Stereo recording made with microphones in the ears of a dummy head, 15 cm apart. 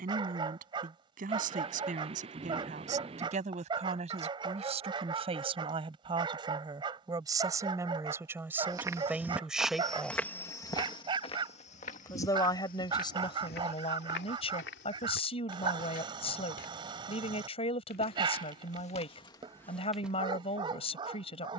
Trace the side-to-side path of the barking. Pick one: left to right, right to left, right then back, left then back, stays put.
stays put.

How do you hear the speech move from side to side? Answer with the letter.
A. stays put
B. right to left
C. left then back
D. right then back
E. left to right
B.